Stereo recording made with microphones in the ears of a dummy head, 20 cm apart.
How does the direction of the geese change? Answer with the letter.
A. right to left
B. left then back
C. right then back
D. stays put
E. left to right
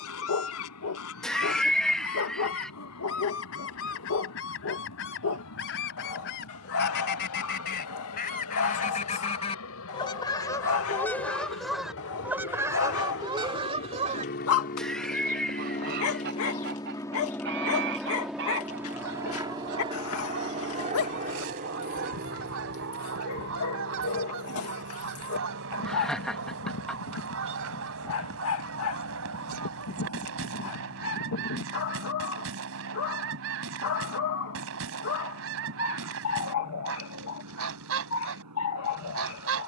E.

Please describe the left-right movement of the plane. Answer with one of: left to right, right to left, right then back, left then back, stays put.
left to right.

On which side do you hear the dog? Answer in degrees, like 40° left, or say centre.
70° left.